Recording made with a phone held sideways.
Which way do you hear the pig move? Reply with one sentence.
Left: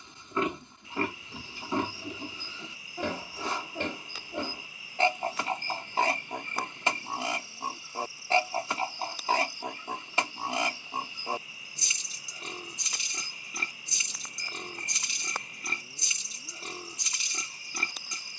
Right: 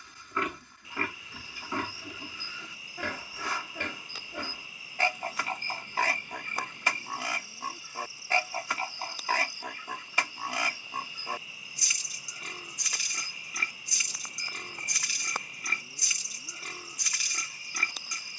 In this clip you hear the pig stay put.